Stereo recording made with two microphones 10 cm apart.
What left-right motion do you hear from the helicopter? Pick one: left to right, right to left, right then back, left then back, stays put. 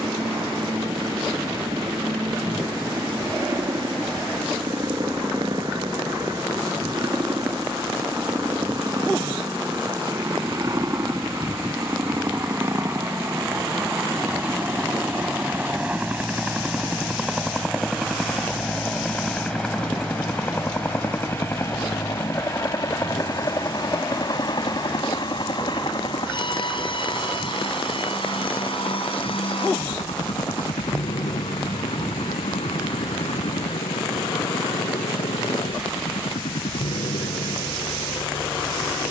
right to left.